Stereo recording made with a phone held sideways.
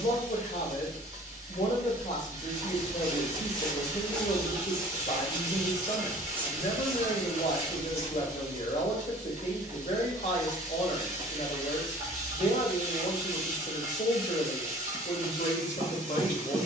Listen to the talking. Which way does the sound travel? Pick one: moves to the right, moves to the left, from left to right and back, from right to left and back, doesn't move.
doesn't move.